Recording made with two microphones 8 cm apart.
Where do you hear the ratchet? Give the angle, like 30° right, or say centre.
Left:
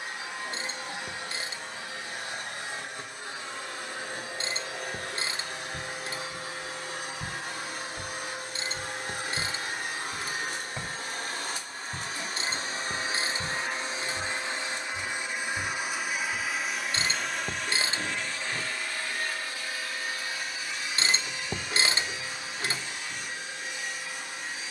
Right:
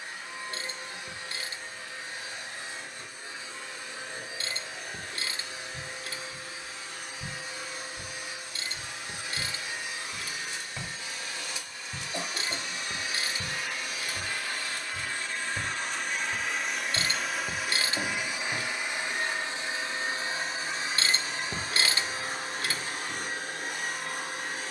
30° left.